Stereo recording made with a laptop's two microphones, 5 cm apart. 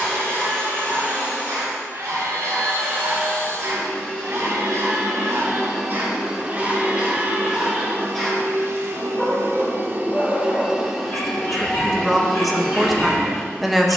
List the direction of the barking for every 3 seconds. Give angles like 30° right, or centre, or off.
80° right, 60° right, 20° right, 30° left, 50° left.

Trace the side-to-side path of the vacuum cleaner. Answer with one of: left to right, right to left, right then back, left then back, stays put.
right then back.